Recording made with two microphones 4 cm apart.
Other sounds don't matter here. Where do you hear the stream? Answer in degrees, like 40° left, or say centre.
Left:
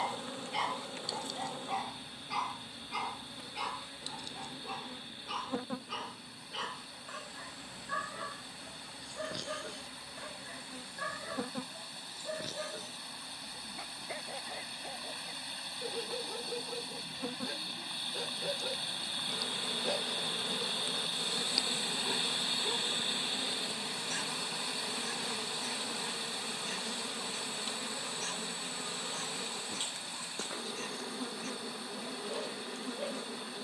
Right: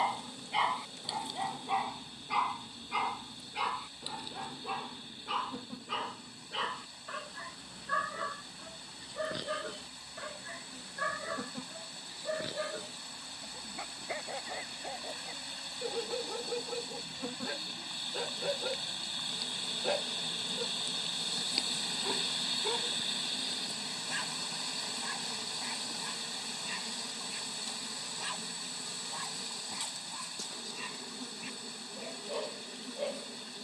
10° left.